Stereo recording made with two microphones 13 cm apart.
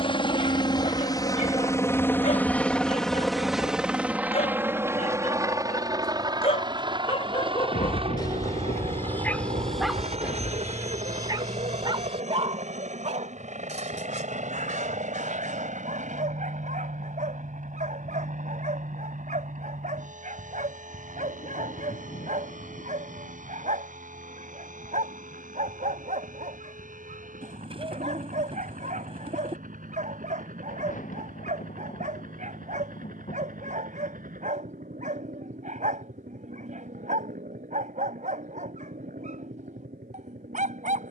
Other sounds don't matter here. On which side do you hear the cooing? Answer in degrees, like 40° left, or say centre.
40° right.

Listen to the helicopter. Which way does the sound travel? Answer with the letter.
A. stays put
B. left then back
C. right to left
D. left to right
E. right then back
D.